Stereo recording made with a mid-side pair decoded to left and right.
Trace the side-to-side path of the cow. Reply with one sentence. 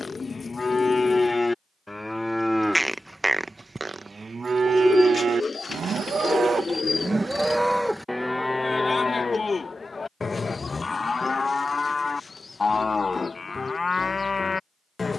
In this clip you hear the cow go right and come back.